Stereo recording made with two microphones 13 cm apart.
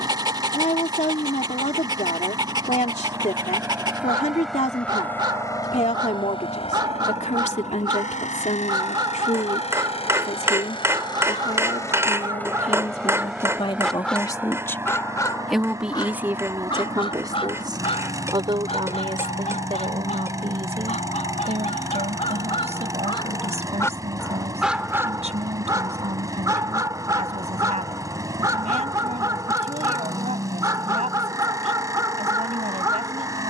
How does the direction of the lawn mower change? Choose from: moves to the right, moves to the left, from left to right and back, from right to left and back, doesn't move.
from right to left and back.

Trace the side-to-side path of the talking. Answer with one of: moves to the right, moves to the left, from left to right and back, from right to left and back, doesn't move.
moves to the right.